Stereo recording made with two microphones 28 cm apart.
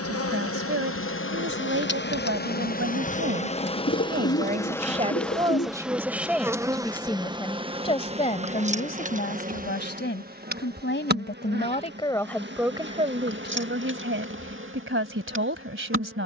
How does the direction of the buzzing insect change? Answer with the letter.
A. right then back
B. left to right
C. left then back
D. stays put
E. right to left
B.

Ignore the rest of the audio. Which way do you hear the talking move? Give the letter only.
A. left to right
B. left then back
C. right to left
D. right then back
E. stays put
B.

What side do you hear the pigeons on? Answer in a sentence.
You can hear the pigeons on the left.